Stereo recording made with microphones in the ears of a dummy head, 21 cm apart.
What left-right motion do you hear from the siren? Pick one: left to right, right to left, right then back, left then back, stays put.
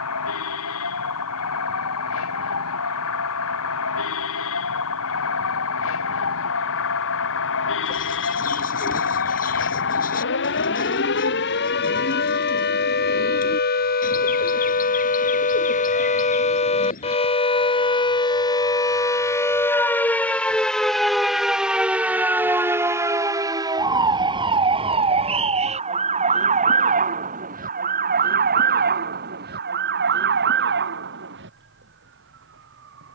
left to right.